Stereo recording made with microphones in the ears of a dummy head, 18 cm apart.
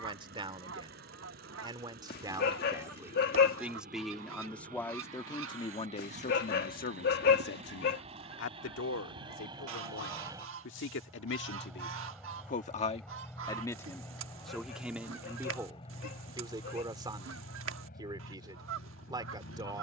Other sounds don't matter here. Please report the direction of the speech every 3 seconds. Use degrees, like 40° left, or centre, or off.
20° right, 10° left, 60° left, 70° left, 20° left, 20° right, 20° right.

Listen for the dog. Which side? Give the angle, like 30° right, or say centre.
50° left.